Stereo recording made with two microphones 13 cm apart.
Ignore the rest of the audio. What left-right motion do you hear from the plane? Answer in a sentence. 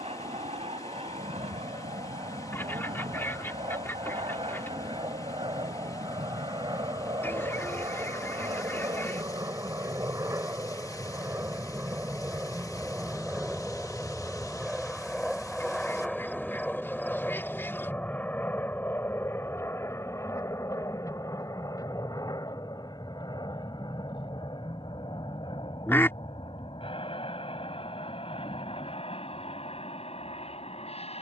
In this clip you hear the plane move to the left.